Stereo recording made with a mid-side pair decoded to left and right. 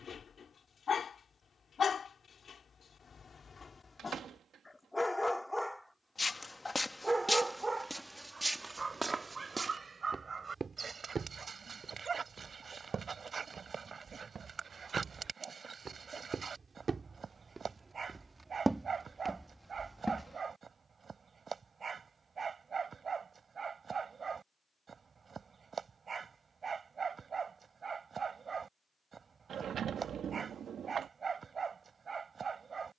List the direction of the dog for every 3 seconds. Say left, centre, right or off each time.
left, left, right, right, right, right, right, right, right, right, right.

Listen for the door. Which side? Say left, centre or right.
right.